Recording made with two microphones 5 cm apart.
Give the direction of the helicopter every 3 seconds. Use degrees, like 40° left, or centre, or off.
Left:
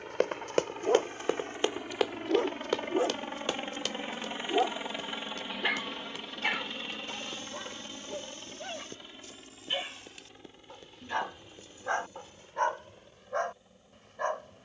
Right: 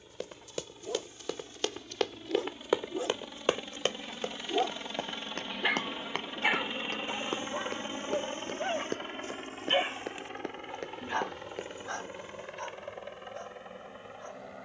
60° left, 20° left, 30° right, 50° right, 60° right.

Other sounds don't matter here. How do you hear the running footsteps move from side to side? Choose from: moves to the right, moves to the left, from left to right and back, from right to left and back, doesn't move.
moves to the right.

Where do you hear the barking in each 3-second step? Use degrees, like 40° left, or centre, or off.
50° left, 10° left, 20° right, 10° right, 60° left.